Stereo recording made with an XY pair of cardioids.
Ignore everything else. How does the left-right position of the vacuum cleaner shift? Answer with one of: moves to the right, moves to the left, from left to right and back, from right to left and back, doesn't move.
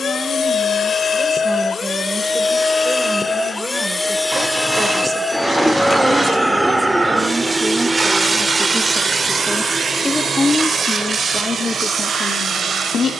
moves to the right.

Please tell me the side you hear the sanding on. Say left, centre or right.
right.